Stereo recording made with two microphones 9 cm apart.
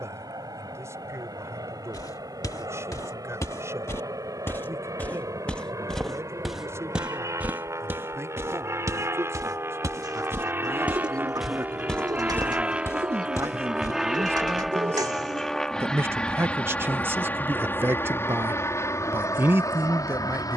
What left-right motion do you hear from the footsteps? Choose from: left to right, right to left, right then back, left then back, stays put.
right then back.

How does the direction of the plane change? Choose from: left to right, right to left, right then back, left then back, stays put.
right to left.